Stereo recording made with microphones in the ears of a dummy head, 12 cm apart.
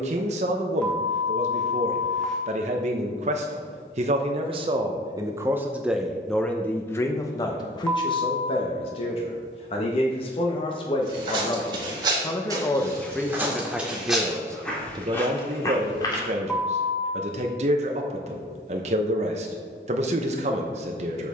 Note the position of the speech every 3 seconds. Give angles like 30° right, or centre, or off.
50° right, 30° right, 30° left, 40° left, centre, 50° right, 50° right.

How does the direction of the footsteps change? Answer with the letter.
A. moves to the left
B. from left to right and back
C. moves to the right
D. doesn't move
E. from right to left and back
A.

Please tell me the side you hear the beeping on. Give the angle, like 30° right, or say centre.
10° left.